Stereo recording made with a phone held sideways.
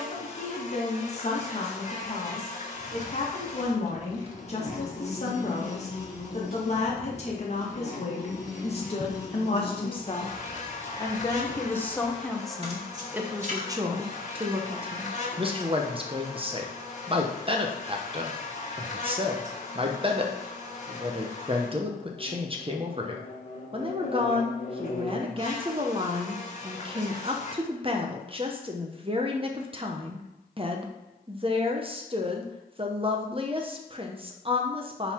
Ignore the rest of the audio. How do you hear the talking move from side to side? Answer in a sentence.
You can hear the talking move from left to right.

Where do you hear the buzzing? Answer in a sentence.
In this clip you hear the buzzing on the left.